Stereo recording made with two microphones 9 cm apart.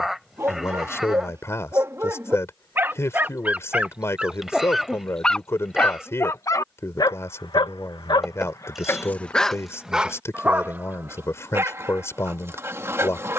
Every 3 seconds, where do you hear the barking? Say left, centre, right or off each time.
right, centre, left, centre, right.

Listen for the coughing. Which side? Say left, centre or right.
centre.